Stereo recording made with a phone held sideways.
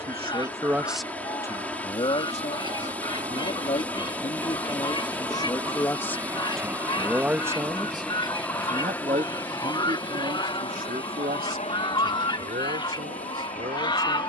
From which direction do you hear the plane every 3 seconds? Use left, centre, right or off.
right, right, centre, left, left.